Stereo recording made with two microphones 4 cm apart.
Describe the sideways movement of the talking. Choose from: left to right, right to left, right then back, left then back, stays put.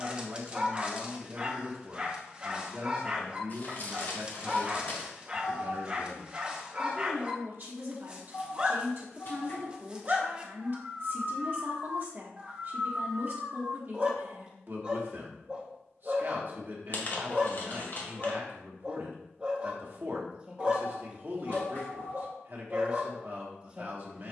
stays put.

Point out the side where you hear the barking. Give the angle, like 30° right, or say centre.
20° right.